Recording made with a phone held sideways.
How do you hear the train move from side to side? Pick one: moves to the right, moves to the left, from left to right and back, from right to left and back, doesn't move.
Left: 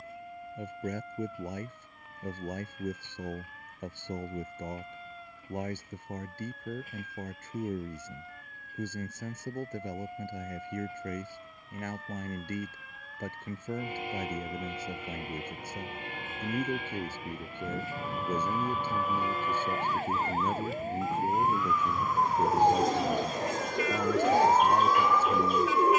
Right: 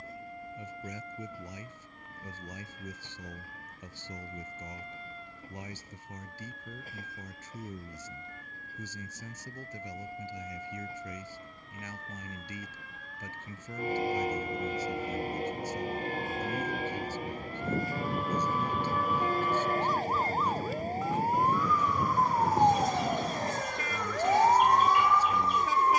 doesn't move.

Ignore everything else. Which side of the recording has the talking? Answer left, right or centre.
left.